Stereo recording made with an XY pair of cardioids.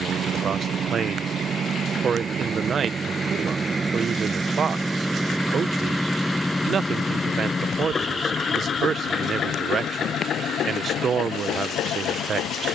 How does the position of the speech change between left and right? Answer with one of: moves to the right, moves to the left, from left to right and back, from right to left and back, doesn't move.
doesn't move.